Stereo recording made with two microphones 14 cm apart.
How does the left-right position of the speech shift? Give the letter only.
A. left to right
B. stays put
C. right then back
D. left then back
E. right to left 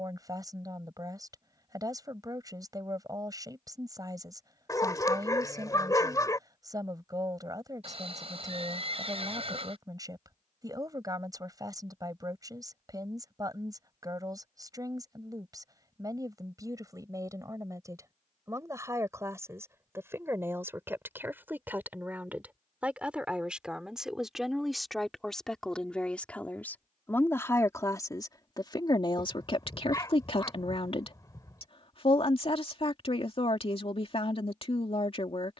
E.